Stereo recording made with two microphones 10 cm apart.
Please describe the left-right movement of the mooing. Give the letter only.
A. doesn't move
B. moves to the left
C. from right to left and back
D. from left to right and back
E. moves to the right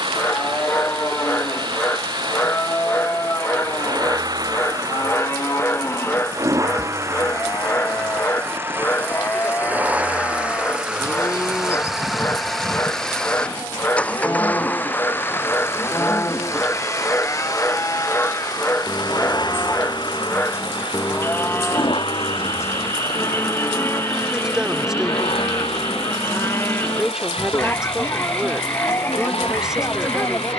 A.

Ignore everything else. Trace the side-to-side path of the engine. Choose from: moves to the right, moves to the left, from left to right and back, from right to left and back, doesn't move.
moves to the left.